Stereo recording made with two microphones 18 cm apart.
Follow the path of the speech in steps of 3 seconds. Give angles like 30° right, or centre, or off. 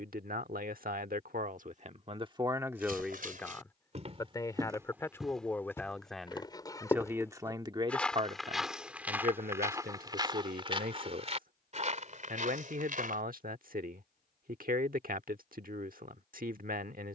50° right, 10° left, 20° right, 60° right, 60° right, 60° right.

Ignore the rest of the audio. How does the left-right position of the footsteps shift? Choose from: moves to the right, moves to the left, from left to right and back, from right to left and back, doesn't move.
from right to left and back.